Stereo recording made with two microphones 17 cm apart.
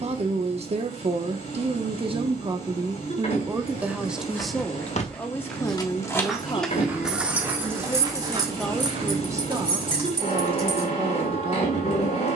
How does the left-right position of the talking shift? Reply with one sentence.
In this clip you hear the talking move from right to left and back again.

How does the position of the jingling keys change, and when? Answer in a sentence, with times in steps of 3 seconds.
You can hear the jingling keys not at all from 0 s, on the left from 3 s, in the centre from 6 s and on the right from 9 s.